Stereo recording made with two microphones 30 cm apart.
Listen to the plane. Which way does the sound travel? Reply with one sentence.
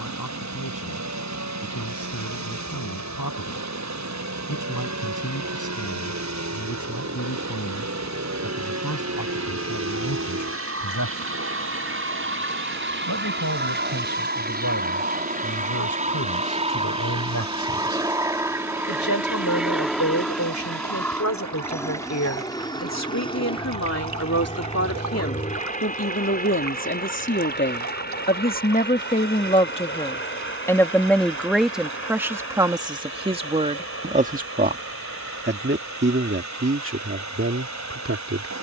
In this clip you hear the plane move from right to left.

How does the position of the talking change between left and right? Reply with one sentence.
In this clip you hear the talking go from the left side to the right.